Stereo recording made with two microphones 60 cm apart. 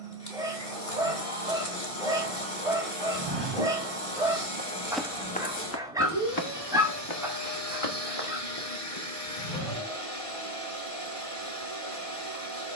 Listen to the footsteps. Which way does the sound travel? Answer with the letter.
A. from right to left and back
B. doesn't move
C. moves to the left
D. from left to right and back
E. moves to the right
C.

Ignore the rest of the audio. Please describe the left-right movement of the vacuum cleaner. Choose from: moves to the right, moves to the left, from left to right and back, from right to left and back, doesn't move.
doesn't move.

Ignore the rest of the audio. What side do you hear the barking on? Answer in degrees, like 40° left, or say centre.
10° right.